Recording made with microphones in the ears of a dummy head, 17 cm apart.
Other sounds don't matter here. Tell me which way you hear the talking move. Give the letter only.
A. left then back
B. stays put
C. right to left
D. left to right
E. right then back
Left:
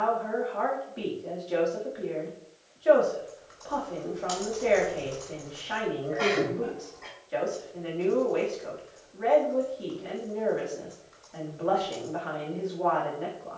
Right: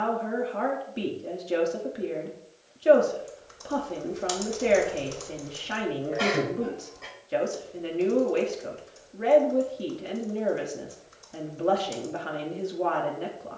B.